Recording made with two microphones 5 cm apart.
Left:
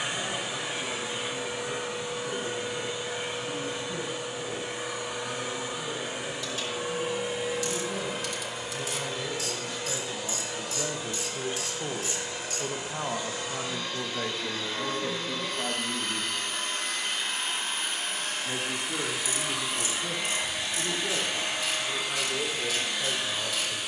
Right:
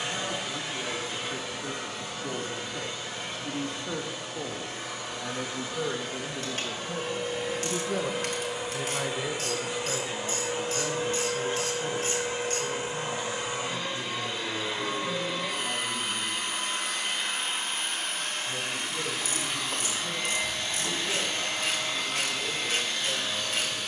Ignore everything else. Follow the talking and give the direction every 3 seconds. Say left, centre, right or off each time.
right, right, right, centre, left, left, left, left.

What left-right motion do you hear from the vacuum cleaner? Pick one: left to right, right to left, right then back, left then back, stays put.
right then back.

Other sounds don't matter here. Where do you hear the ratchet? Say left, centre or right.
right.